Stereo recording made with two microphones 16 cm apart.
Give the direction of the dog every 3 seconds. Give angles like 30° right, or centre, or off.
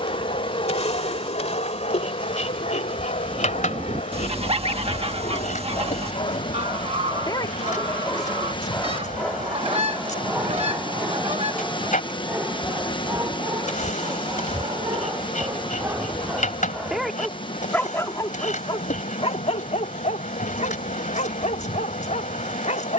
50° left, 50° left, 30° left, centre, 20° right, 10° right, 40° left, 50° left.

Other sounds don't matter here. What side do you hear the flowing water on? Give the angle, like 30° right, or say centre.
30° left.